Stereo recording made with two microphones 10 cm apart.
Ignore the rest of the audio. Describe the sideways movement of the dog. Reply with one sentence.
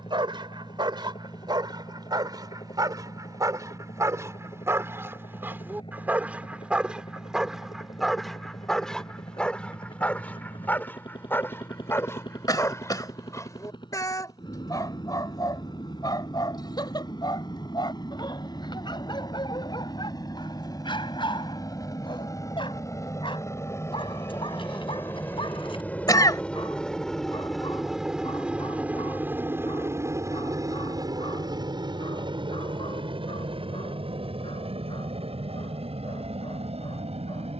You can hear the dog travel towards the left.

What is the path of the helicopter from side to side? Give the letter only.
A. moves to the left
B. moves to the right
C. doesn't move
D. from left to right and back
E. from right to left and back
B.